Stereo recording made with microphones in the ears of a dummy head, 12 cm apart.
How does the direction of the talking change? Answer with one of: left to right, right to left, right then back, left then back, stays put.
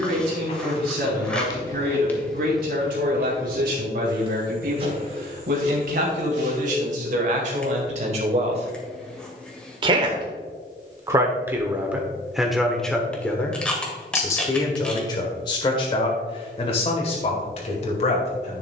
right to left.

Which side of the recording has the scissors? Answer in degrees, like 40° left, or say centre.
10° left.